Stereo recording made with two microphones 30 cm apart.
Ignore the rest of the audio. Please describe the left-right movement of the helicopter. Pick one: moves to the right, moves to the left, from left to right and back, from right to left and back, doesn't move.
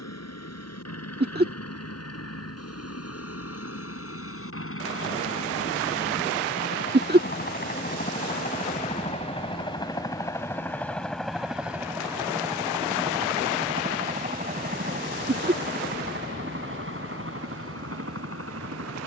moves to the right.